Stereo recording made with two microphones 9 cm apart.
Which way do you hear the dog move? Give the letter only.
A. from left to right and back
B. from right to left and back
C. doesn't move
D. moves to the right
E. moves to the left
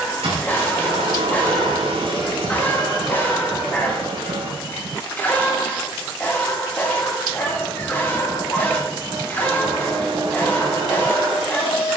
C.